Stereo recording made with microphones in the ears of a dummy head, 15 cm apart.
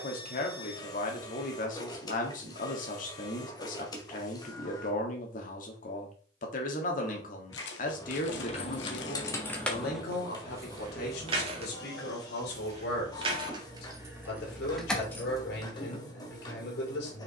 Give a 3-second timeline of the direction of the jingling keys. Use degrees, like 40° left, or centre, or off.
off, off, 40° left, 10° right, 20° right, 20° left.